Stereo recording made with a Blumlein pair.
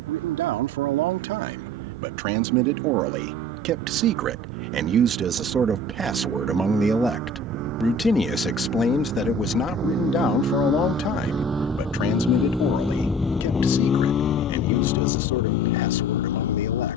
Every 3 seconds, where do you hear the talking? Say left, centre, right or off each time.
right, right, centre, left, left, left.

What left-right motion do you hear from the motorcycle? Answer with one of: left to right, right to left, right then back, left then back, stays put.
right to left.